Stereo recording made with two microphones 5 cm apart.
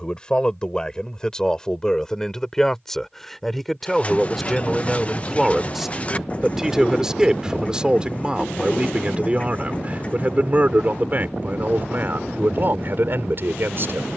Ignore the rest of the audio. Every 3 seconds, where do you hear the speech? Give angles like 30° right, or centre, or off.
10° left, centre, 20° right, 30° right, 50° right.